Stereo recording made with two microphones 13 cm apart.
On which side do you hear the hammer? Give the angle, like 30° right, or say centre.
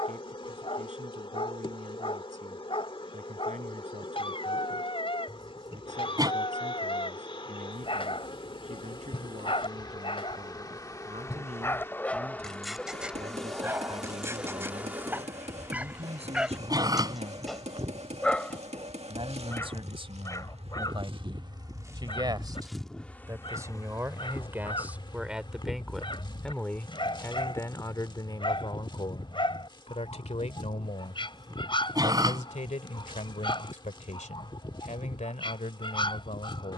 50° right.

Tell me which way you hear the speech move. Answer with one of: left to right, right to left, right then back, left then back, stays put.
right to left.